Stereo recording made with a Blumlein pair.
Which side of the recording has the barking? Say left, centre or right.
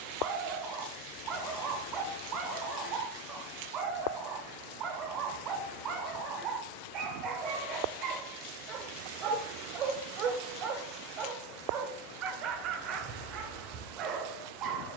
right.